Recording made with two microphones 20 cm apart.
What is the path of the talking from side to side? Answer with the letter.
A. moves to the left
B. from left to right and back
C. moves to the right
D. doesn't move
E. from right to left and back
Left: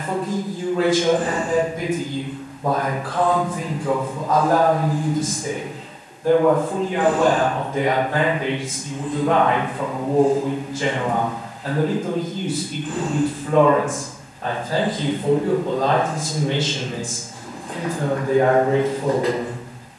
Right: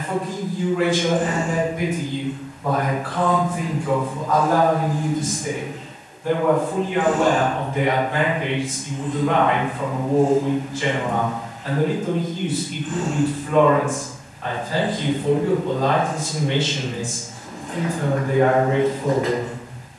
D.